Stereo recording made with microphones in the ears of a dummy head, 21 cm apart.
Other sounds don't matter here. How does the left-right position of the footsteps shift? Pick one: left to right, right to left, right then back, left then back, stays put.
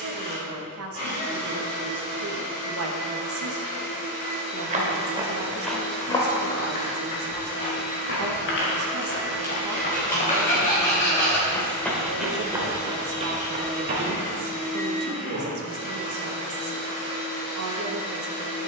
left then back.